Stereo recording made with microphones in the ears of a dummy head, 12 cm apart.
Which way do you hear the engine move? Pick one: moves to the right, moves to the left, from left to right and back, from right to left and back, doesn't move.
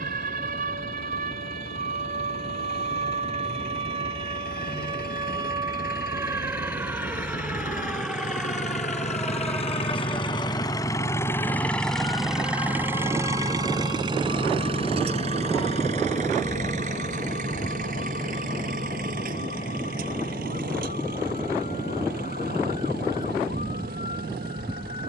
moves to the right.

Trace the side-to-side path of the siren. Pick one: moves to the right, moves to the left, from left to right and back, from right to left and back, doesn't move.
moves to the left.